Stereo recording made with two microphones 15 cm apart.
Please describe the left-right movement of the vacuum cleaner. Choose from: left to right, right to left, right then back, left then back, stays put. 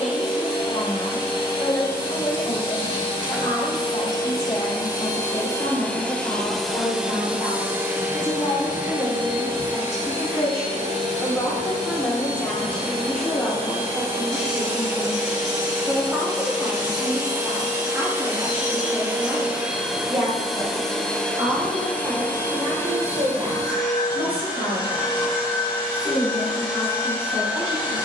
right then back.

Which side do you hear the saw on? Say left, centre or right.
right.